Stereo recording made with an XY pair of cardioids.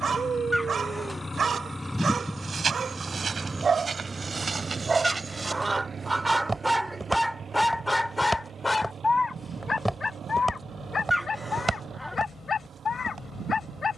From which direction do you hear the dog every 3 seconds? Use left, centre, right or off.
right, right, centre, left, left.